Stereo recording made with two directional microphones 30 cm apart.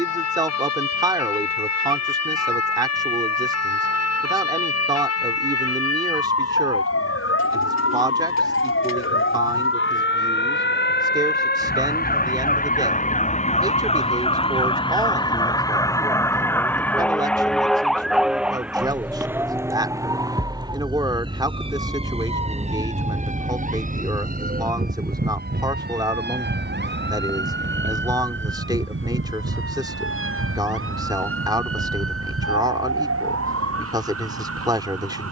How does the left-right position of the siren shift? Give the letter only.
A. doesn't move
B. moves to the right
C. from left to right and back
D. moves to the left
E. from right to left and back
B.